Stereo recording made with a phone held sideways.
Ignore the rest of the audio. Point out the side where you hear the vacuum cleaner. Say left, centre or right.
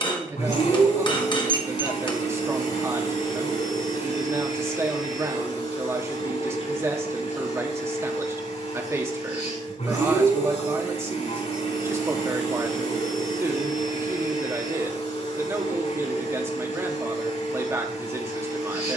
left.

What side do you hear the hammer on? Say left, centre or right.
left.